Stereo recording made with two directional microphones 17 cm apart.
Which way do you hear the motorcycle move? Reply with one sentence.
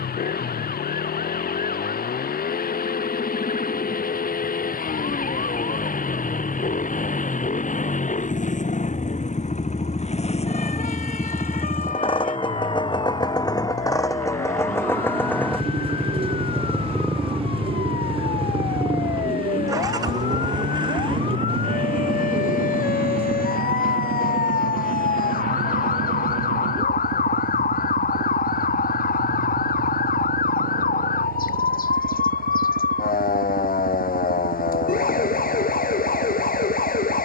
In this clip you hear the motorcycle travel towards the right.